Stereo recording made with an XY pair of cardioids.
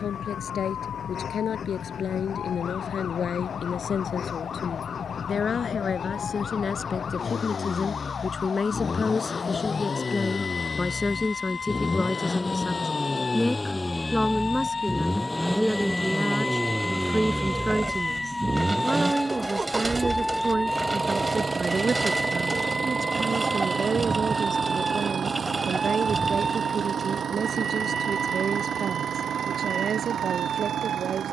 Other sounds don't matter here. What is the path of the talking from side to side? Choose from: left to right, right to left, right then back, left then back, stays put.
left to right.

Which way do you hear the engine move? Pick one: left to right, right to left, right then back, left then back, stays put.
left to right.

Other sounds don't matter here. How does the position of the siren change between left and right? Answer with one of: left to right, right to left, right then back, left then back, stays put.
left to right.